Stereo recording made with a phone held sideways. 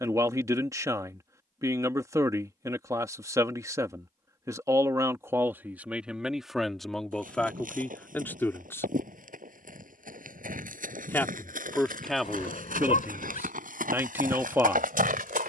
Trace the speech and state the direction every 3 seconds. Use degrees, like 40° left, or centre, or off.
20° right, 20° right, 10° left, 10° left, 10° right.